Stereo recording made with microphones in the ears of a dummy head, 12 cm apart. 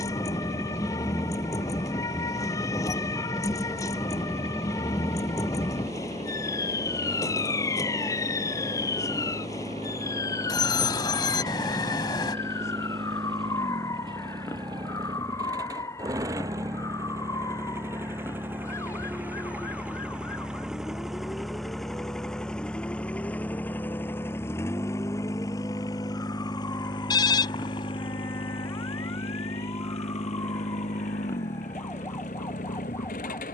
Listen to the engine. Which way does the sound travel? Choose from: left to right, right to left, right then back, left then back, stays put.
right to left.